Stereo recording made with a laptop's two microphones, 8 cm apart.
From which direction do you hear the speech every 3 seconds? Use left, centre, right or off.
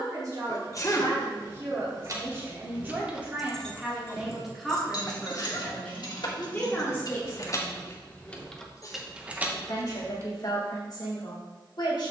right, centre, left, left.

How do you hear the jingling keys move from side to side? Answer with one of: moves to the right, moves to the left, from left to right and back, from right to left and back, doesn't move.
from right to left and back.